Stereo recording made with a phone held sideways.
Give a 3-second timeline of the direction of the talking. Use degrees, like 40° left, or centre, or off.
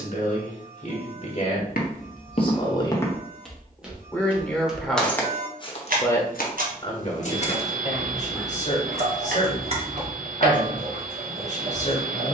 40° left, 10° left, 40° left, 50° left.